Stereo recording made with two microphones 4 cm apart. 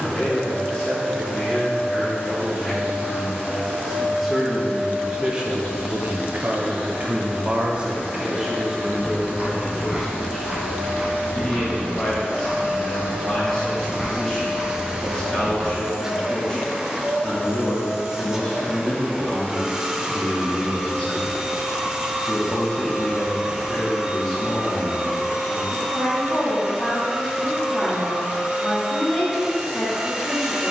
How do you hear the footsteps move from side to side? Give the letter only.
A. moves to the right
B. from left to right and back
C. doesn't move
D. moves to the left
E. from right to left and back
E.